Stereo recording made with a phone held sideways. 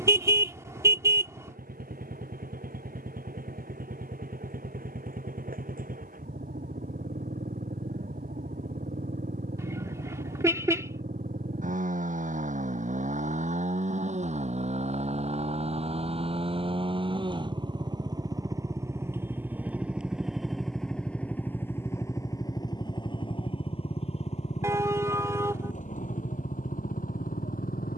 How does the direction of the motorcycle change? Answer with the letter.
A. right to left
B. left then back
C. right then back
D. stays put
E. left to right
A.